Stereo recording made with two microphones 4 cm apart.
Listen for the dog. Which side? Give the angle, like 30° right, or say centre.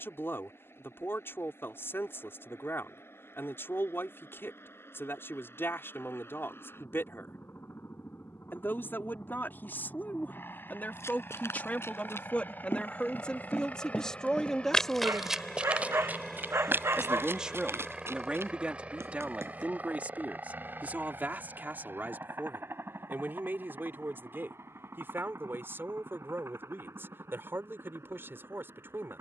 80° right.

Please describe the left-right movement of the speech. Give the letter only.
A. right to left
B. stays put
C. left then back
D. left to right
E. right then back
D.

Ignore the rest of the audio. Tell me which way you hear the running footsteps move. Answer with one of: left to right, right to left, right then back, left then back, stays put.
left to right.